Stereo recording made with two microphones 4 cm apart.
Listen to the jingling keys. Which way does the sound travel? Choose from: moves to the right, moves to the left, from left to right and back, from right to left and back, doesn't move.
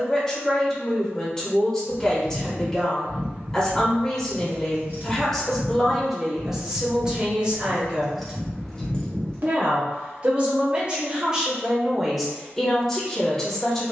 from left to right and back.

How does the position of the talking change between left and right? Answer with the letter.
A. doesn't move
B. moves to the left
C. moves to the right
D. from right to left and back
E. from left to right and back
E.